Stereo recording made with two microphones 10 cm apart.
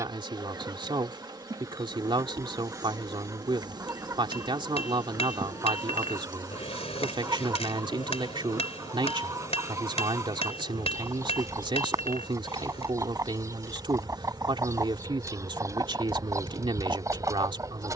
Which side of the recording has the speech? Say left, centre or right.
right.